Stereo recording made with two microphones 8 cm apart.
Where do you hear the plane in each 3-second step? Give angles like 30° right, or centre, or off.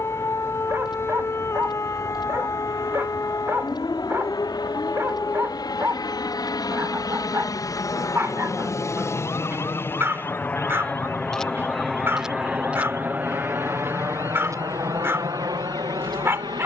70° left, 60° left, 50° left, 20° left, 20° right, 50° right.